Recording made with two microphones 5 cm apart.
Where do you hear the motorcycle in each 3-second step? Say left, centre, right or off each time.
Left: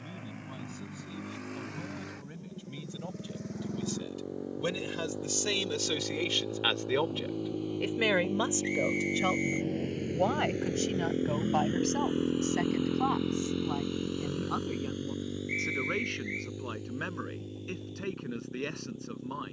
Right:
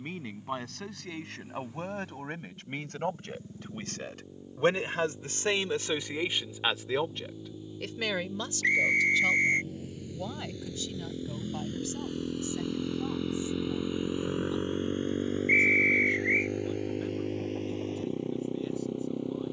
left, left, left, left, centre, right, right.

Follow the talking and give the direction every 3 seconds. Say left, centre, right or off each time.
right, right, centre, left, left, left, left.